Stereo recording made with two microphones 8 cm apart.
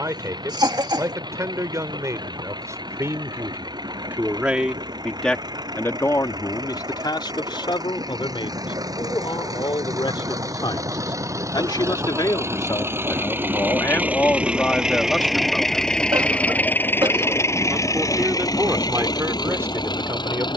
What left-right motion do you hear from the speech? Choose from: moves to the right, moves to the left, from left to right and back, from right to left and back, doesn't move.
from right to left and back.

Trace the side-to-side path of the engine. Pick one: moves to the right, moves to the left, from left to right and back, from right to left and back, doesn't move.
moves to the left.